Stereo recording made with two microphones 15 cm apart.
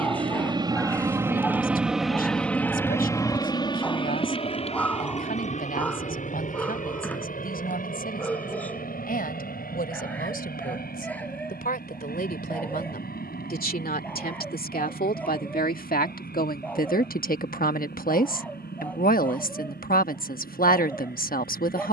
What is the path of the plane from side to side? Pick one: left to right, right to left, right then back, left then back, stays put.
right to left.